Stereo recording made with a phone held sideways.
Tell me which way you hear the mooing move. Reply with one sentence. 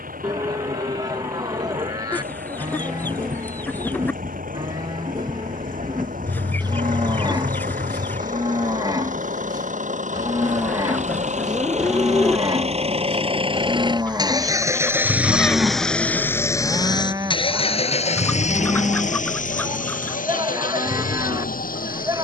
In this clip you hear the mooing stay put.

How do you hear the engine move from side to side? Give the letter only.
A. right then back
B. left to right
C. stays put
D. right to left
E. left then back
D.